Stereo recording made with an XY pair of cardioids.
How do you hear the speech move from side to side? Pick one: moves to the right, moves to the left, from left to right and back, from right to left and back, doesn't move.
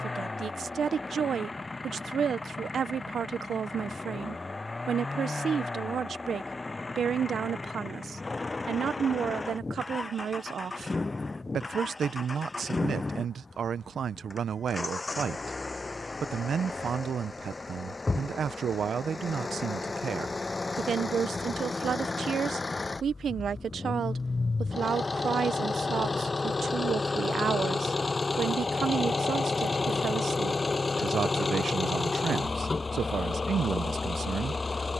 doesn't move.